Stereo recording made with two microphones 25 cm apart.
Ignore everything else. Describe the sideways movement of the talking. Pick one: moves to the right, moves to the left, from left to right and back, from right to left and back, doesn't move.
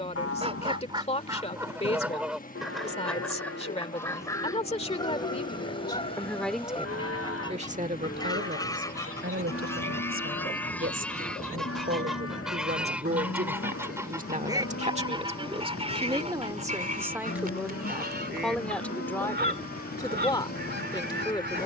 from left to right and back.